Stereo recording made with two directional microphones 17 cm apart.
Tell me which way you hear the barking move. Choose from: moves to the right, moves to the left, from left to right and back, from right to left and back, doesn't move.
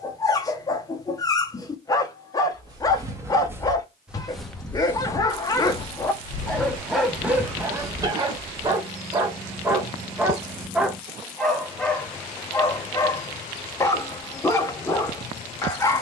from left to right and back.